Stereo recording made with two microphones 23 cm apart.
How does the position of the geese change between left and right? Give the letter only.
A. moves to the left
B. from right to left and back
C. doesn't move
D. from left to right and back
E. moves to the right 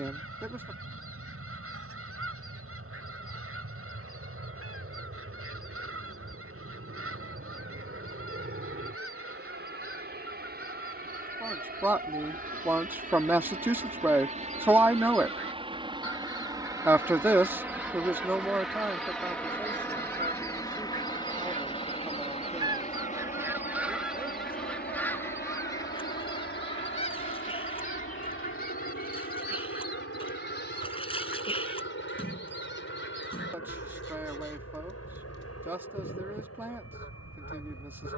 A.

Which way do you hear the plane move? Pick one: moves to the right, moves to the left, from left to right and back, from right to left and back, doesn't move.
moves to the left.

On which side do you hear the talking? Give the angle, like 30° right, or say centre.
10° right.